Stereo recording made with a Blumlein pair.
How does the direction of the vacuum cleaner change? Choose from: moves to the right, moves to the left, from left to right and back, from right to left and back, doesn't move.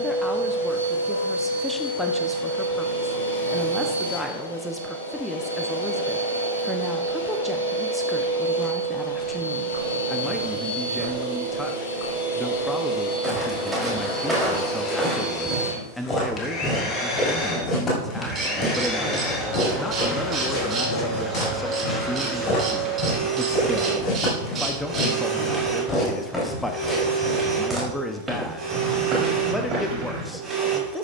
moves to the right.